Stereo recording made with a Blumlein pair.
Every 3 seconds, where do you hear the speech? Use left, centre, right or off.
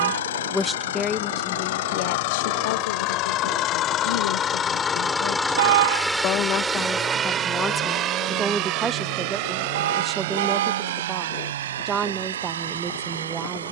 left, left, centre, right, right.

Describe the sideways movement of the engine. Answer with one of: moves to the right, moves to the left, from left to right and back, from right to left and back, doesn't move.
moves to the right.